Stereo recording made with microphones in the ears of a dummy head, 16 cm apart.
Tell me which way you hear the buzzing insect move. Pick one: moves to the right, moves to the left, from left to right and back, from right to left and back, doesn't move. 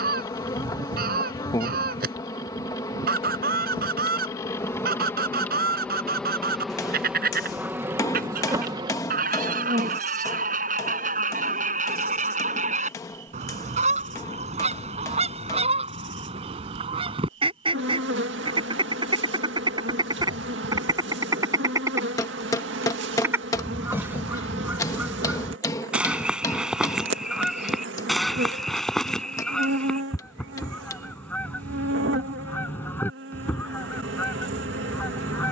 moves to the right.